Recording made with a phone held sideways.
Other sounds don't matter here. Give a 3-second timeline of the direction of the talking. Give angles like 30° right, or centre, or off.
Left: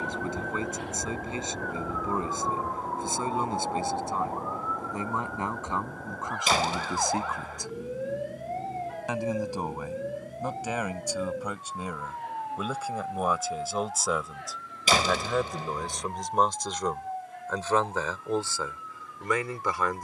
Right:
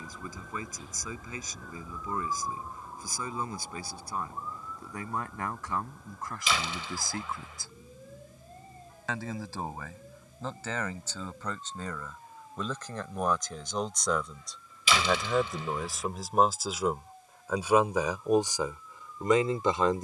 30° left, 20° left, 20° left, 10° left, 10° left, centre, 20° right.